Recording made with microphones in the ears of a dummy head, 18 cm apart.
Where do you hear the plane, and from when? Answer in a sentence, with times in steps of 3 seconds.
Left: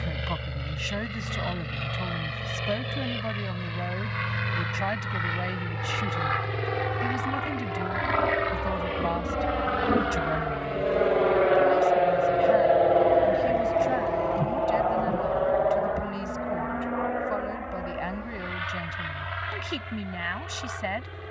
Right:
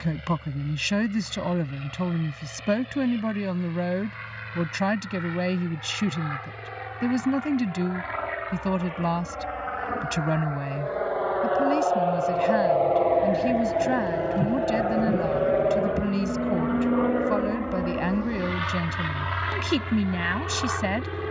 In this clip you hear the plane on the left from 0 s, in the centre from 12 s and on the right from 15 s.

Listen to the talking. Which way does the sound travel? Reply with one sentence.
In this clip you hear the talking stay put.